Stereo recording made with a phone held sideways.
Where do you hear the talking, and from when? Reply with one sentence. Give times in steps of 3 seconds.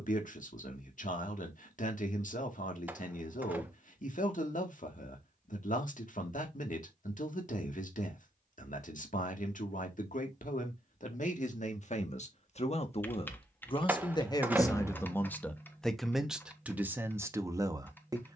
In this clip you hear the talking on the left from 0 s and in the centre from 15 s.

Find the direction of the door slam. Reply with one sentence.
In this clip you hear the door slam in the centre.